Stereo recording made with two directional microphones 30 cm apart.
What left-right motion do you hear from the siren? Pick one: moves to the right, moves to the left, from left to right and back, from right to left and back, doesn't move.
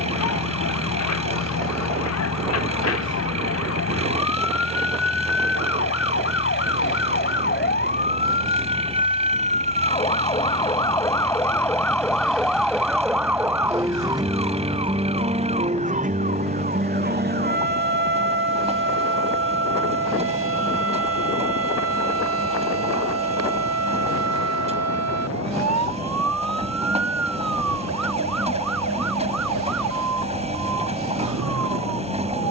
moves to the right.